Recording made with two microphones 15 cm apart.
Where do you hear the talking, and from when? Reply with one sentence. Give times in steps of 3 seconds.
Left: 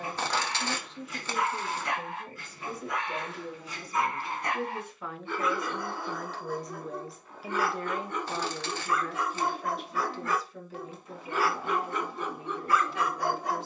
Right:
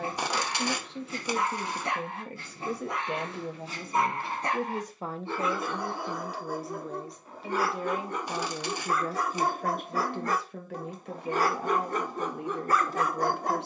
You can hear the talking on the right from 0 s, in the centre from 6 s and on the right from 9 s.